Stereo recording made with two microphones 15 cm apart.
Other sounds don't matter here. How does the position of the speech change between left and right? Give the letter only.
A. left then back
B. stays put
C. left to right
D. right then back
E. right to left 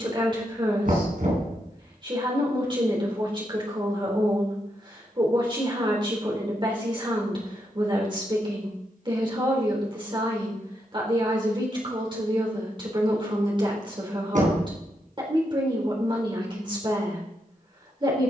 B.